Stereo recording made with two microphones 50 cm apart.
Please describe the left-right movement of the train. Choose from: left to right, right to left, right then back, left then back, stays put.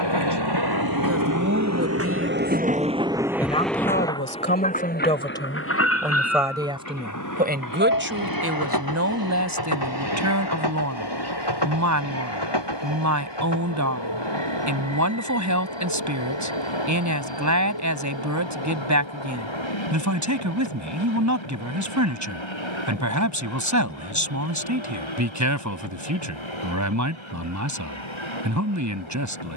right to left.